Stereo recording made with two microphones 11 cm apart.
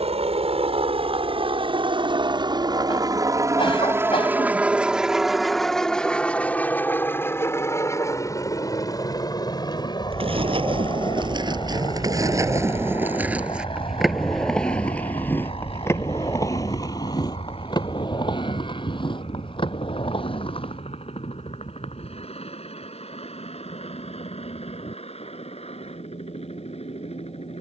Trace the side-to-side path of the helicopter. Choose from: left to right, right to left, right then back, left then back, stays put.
right to left.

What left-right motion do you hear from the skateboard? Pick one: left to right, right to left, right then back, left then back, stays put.
right to left.